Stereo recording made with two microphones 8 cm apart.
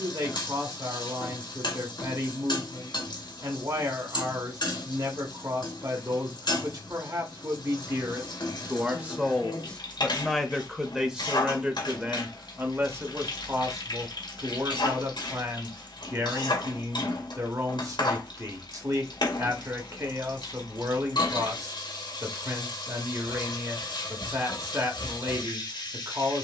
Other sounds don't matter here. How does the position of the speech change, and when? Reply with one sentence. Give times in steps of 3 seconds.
You can hear the speech on the right from 0 s, in the centre from 9 s and on the right from 12 s.